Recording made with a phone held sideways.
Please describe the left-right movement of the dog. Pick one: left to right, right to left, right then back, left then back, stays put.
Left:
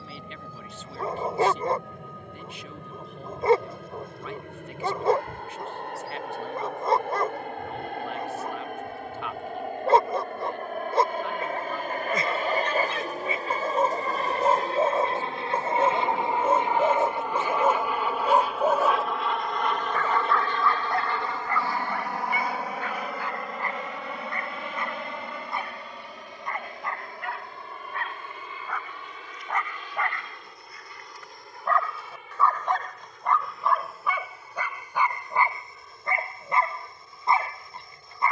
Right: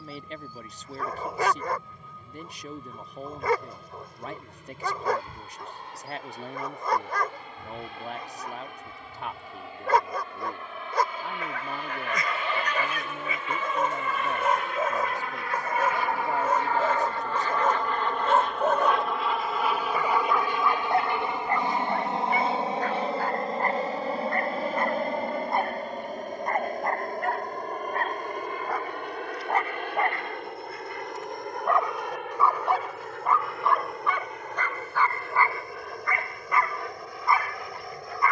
right then back.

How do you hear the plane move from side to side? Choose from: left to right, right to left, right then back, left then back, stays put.
left to right.